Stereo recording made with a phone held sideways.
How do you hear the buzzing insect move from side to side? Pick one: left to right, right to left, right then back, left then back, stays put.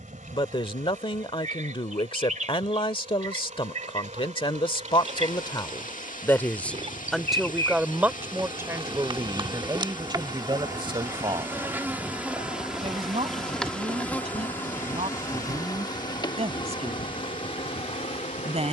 right to left.